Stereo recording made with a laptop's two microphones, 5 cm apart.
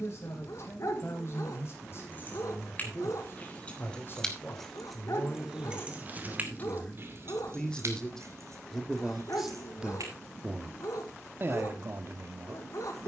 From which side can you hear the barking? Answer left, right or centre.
left.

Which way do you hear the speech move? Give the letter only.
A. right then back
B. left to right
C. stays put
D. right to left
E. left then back
B.